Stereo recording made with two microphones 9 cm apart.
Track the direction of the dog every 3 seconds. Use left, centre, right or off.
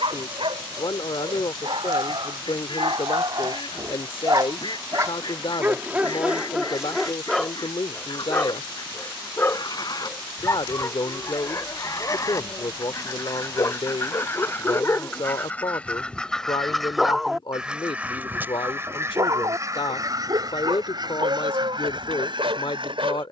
right, right, centre, left, left, centre, right, right.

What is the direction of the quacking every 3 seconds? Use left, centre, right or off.
left, left, left, left, left, centre, right, right.